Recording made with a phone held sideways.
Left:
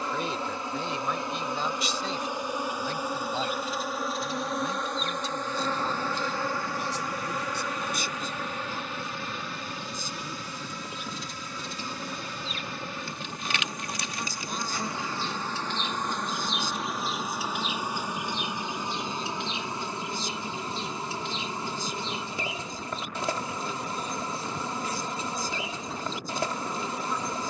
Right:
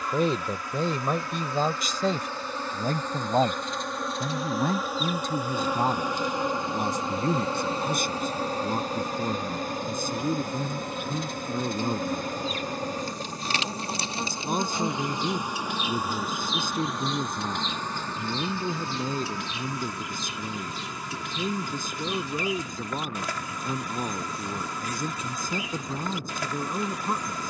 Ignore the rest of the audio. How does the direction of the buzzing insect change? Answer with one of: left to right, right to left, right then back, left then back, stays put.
right then back.